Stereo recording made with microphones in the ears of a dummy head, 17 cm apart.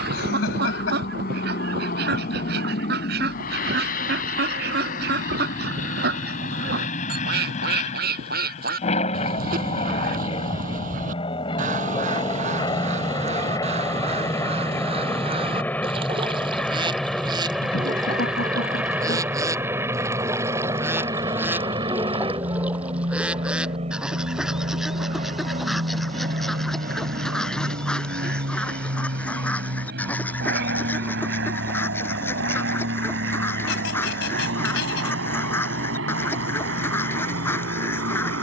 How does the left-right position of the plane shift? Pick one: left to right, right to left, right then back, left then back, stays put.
left to right.